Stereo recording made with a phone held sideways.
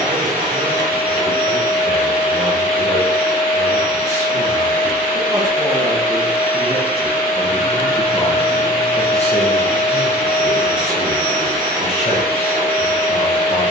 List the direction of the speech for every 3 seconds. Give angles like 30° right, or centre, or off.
50° right, 40° right, 10° left, 40° left, 50° left.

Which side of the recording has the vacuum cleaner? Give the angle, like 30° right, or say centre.
70° right.